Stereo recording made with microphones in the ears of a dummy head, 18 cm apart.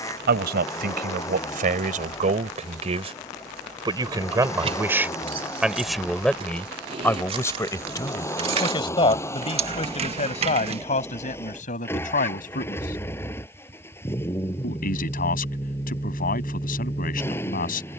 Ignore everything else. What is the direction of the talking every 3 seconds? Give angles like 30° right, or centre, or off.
40° right, 10° right, 10° left, 30° left, 40° left, 40° left.